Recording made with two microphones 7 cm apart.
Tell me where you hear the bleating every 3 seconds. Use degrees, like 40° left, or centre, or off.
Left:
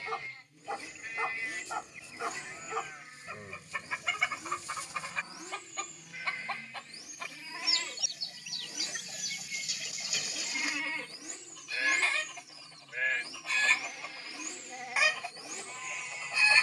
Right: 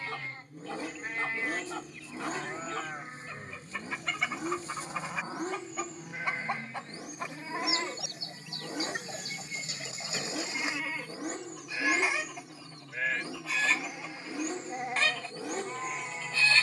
40° right, 40° right, 40° right, 10° right, 10° right, 40° right.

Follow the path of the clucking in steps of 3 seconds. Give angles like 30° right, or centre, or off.
20° left, centre, 30° right, 30° right, 10° right, 10° left.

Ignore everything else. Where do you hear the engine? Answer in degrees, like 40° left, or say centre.
60° right.